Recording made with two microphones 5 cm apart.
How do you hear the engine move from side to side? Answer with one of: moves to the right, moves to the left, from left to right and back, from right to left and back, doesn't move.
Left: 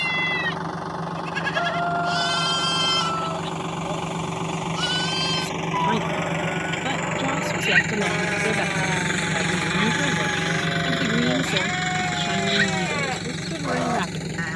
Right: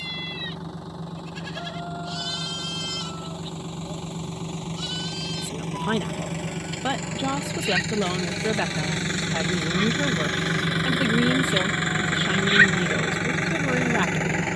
moves to the right.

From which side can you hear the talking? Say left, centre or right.
centre.